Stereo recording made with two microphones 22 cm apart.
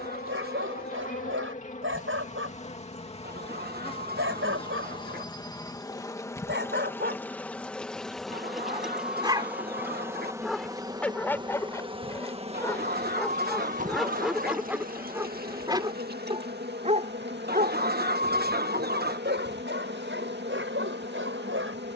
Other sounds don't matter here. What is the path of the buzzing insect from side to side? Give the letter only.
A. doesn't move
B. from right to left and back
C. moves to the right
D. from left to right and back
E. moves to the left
C.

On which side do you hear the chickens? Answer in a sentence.
You can hear the chickens on the right.